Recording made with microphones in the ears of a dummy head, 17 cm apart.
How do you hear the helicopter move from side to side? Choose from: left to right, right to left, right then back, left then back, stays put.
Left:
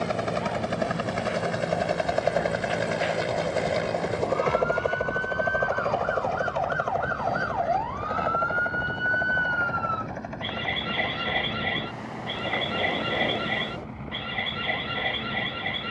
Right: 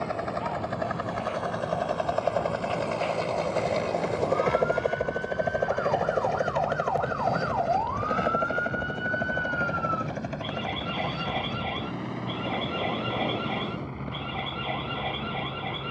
left to right.